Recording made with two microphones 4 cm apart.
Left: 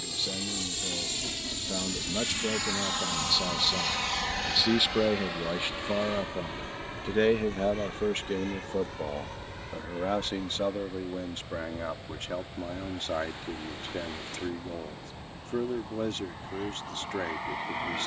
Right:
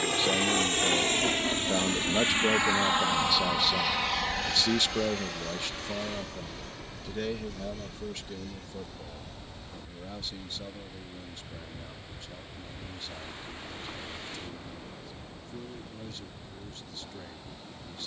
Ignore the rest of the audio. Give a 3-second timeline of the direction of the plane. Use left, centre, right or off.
right, centre, left, left, left, left.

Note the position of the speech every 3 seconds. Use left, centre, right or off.
right, centre, left, left, left, left.